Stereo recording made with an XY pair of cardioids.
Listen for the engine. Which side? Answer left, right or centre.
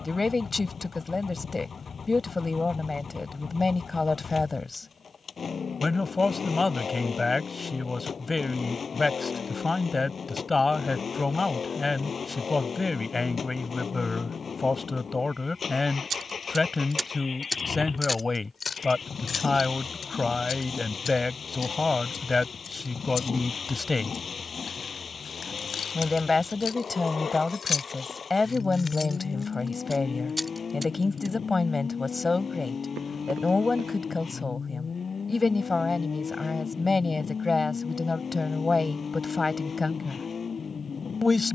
left.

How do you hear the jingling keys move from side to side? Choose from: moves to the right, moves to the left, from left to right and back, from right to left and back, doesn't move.
from right to left and back.